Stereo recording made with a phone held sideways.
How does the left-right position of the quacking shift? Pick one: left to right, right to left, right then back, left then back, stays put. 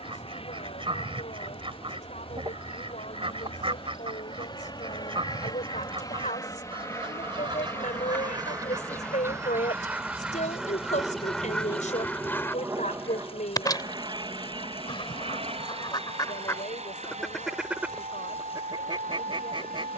left then back.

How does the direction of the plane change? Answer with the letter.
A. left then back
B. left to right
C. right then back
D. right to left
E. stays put
B.